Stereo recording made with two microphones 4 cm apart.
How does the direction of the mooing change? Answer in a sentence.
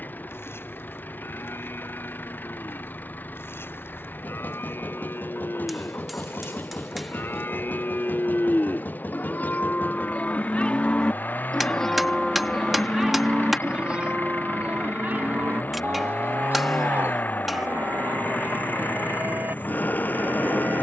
In this clip you hear the mooing move to the right.